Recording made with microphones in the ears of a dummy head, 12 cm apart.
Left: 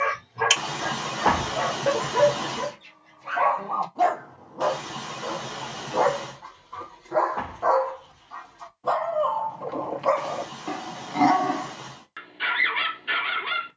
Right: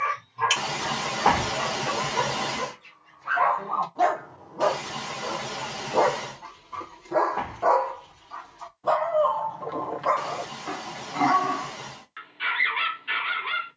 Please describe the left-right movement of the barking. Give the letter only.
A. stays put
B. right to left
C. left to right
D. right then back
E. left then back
D.